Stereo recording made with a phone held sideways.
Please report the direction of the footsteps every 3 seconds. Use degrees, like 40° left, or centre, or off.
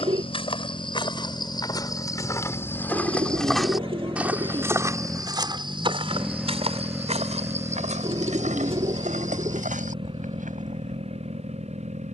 30° left, 20° right, 60° right, 70° right.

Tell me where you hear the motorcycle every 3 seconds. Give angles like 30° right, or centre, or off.
40° left, 20° left, 20° right, 40° right.